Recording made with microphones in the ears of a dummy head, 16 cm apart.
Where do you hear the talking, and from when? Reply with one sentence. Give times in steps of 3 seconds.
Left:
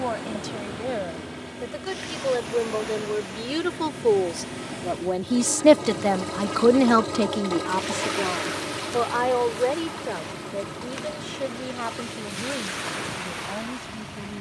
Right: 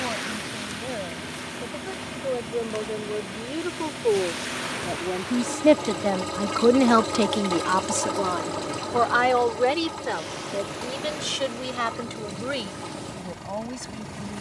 You can hear the talking on the left from 0 s and on the right from 6 s.